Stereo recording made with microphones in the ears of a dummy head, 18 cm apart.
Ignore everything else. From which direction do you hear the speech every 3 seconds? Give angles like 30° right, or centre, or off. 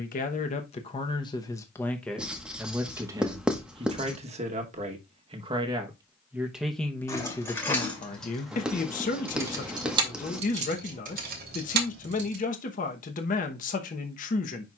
20° left, 30° right, 20° left, 40° left, 40° left.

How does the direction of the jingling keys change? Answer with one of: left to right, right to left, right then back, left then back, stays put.
left to right.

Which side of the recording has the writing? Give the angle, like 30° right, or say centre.
centre.